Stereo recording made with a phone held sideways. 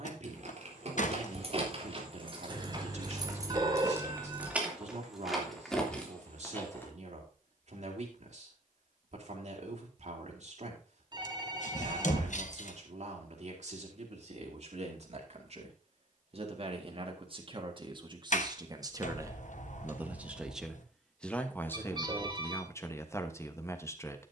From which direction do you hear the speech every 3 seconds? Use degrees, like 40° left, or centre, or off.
60° right, 60° right, 60° right, 60° right, 50° right, 40° right, 20° right, 20° left.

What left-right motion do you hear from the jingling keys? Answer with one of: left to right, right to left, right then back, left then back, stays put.
right to left.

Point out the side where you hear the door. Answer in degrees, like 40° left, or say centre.
60° left.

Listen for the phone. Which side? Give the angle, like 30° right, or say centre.
30° right.